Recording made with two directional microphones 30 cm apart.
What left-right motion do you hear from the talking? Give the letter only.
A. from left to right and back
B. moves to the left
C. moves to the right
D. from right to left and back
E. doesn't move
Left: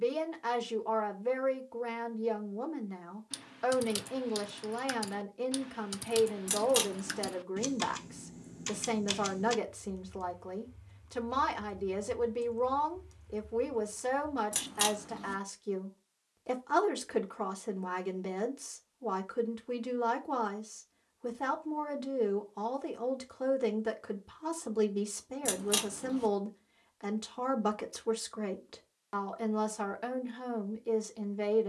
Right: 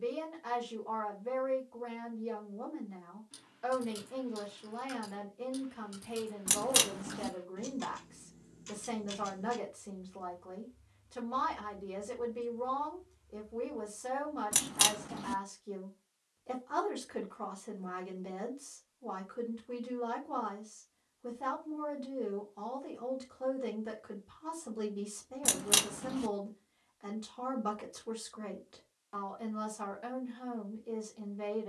E.